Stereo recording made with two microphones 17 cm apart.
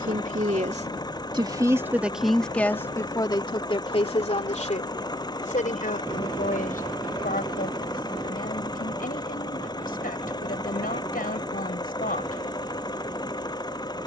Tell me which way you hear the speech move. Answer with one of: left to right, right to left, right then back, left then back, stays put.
right to left.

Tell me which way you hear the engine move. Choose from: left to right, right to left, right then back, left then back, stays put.
stays put.